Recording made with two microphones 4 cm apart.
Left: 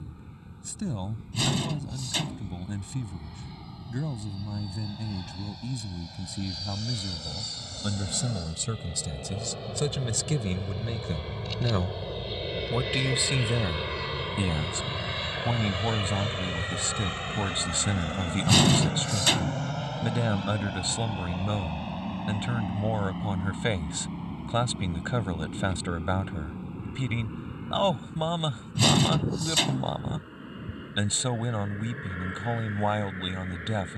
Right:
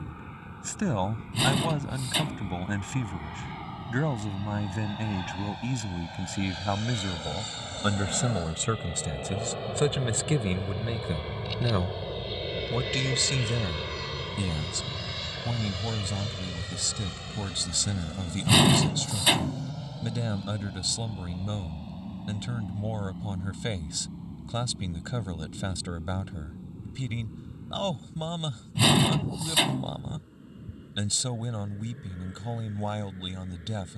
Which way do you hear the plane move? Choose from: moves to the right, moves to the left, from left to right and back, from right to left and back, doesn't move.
moves to the left.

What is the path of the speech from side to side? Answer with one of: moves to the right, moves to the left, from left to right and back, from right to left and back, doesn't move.
moves to the left.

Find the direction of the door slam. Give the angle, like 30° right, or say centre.
20° right.